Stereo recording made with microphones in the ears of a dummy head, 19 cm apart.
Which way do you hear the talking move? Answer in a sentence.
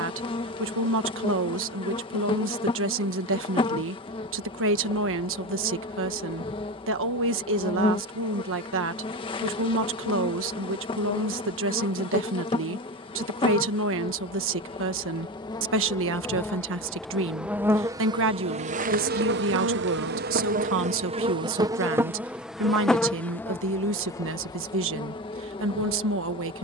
You can hear the talking stay in one place.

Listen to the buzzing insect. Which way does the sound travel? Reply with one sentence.
You can hear the buzzing insect go right and come back.